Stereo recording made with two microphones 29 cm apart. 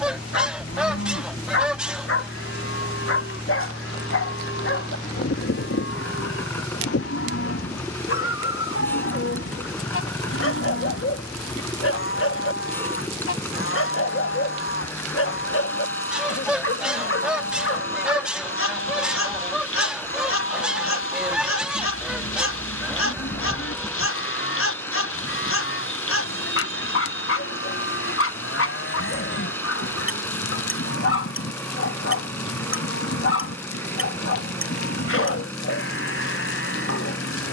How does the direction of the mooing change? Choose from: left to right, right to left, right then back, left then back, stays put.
stays put.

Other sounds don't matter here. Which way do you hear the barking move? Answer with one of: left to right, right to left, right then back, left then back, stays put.
stays put.